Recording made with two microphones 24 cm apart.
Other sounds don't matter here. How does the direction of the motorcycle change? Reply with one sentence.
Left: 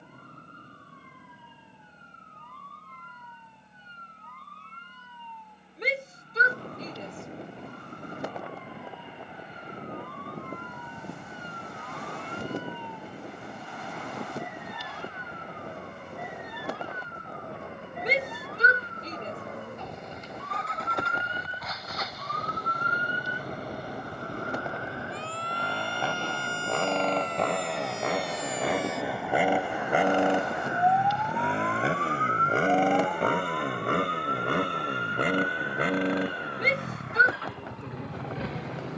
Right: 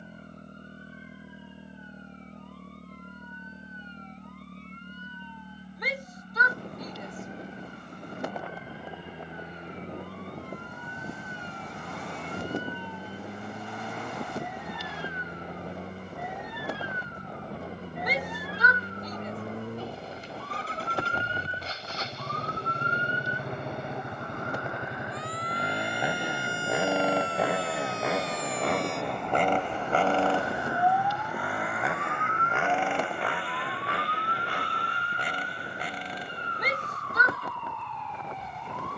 You can hear the motorcycle move to the left.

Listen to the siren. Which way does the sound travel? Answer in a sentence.
In this clip you hear the siren move to the right.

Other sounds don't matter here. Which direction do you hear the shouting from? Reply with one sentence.
In this clip you hear the shouting on the left.